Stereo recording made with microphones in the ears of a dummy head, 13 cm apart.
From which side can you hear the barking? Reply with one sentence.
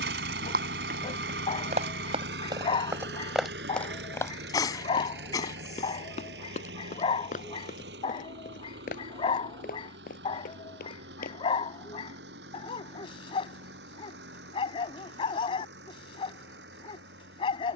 In this clip you hear the barking on the left.